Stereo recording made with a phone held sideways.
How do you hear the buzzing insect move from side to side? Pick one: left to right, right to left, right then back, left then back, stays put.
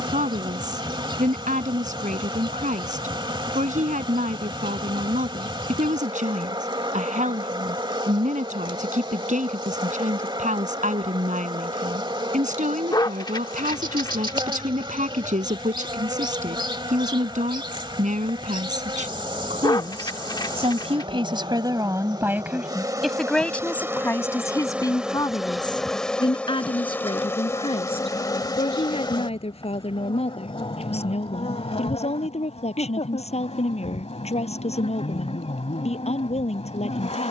right to left.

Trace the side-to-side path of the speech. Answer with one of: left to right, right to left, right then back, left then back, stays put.
right to left.